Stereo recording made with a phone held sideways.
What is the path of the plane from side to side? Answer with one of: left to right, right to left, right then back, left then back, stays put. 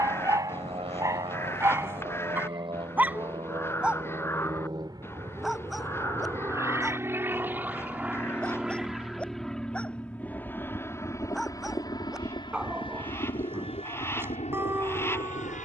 right to left.